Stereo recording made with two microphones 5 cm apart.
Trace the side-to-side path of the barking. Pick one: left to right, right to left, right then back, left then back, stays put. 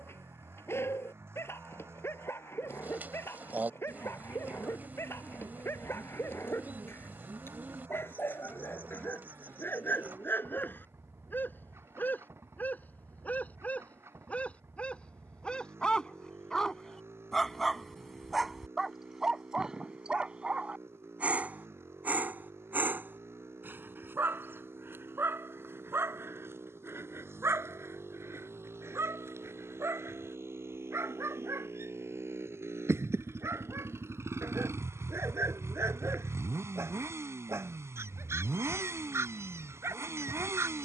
left to right.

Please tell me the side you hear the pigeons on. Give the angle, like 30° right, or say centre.
40° right.